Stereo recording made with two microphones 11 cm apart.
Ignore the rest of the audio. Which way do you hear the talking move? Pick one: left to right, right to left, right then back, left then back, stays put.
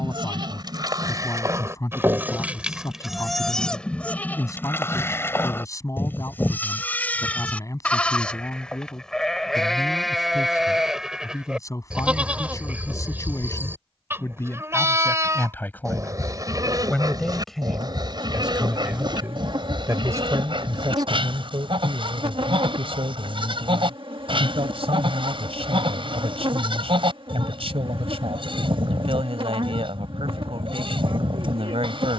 left to right.